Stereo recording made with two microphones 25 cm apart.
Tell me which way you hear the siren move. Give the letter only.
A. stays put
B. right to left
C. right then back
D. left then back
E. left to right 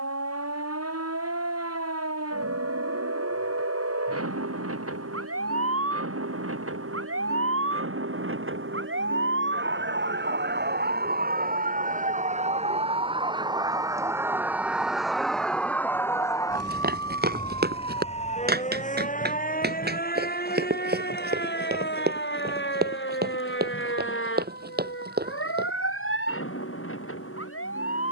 B.